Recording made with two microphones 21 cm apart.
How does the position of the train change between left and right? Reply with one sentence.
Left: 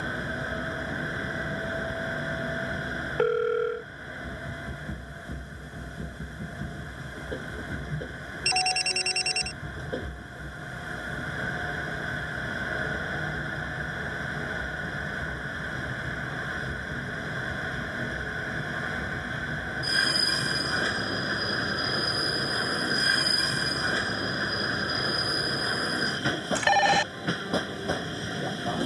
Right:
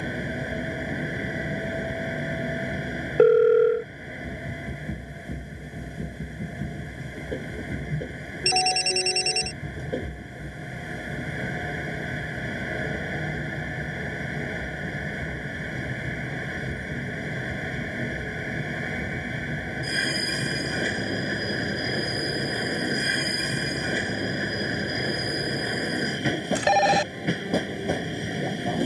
In this clip you hear the train stay in one place.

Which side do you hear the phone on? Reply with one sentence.
In this clip you hear the phone on the right.